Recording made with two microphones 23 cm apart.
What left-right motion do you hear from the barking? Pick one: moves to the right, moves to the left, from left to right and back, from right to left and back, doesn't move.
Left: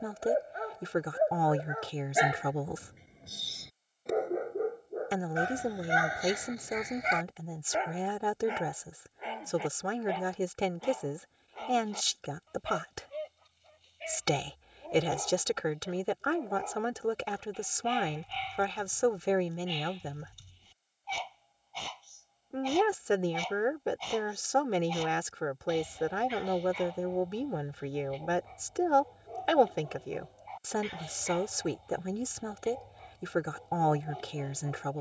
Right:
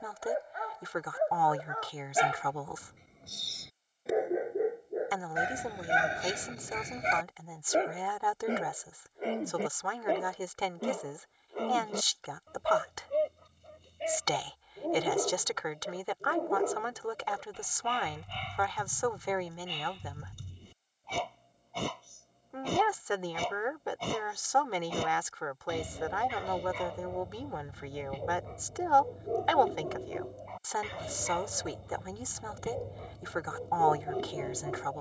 moves to the right.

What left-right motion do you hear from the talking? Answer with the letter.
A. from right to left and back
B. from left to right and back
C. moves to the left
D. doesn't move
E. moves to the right
D.